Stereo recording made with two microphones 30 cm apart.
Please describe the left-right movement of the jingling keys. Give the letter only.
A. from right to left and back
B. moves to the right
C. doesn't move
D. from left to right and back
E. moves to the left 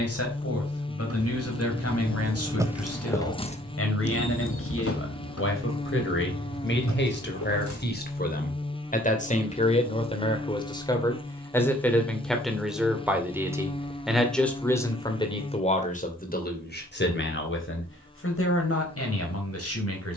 E.